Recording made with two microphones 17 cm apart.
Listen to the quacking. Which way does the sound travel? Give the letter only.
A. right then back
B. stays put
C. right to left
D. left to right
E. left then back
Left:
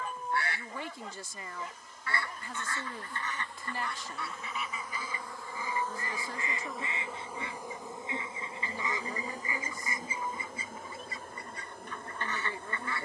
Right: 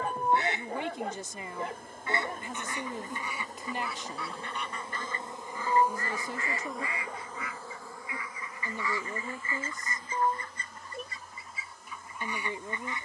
E.